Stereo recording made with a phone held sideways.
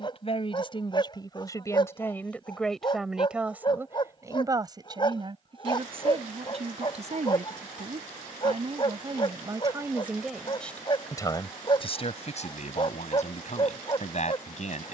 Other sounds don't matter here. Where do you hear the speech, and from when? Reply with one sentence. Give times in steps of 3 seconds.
In this clip you hear the speech on the left from 0 s, on the right from 3 s, in the centre from 9 s and on the left from 12 s.